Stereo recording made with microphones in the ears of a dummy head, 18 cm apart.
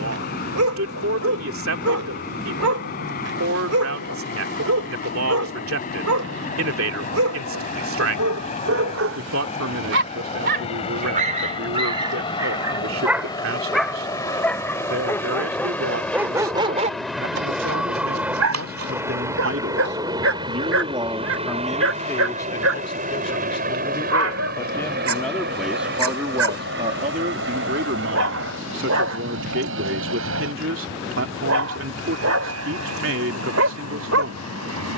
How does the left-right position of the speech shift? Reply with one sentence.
In this clip you hear the speech move from right to left and back again.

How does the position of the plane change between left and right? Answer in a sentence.
You can hear the plane move to the right.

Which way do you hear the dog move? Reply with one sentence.
In this clip you hear the dog go left and come back.